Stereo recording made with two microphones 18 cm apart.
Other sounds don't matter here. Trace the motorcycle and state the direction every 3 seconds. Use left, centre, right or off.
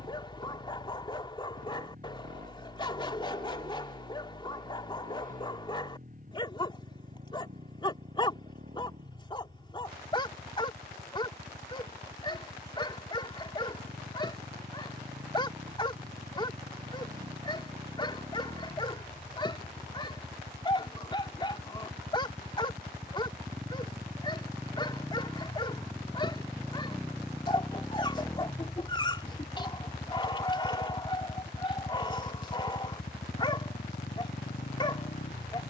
right, right, right, right, right, right, right, right, centre, centre, left, left.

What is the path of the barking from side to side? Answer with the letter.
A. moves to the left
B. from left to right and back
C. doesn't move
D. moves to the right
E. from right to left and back
C.